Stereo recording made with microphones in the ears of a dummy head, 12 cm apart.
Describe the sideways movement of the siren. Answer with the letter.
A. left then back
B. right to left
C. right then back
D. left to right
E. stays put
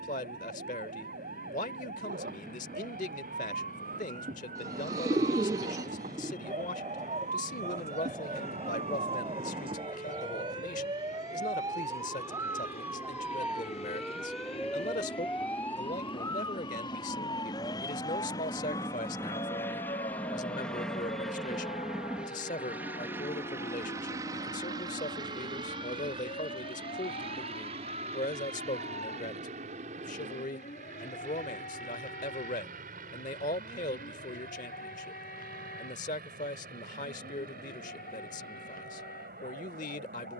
B.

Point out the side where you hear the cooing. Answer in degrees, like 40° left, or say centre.
30° right.